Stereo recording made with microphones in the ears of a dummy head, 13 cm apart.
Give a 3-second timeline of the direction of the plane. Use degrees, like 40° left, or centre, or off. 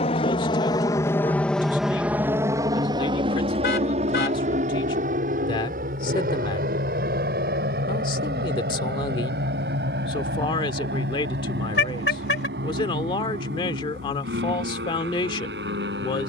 10° left, 50° right, 60° right, 70° right, 70° right, 70° right.